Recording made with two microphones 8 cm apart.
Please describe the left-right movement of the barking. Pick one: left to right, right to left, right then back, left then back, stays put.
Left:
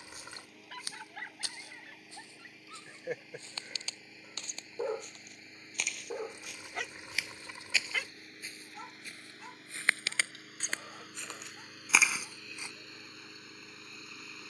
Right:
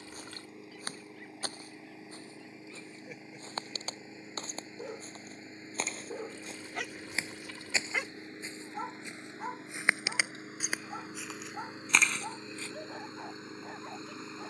left to right.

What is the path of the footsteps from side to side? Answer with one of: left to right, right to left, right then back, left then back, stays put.
right to left.